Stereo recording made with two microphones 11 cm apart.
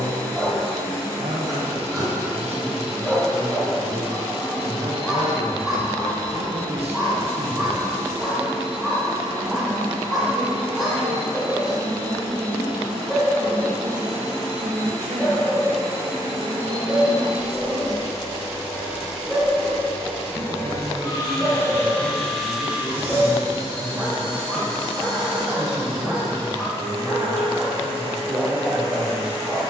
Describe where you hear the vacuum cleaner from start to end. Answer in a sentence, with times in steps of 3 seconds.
In this clip you hear the vacuum cleaner on the right from 0 s, in the centre from 18 s and on the right from 24 s.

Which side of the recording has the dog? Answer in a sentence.
In this clip you hear the dog in the centre.